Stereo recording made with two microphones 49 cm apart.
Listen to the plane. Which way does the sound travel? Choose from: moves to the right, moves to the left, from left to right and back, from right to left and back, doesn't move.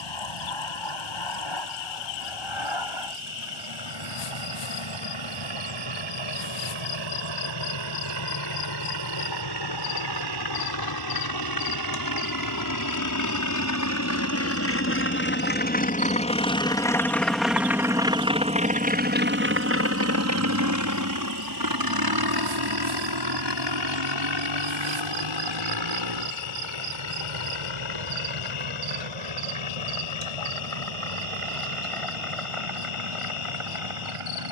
moves to the right.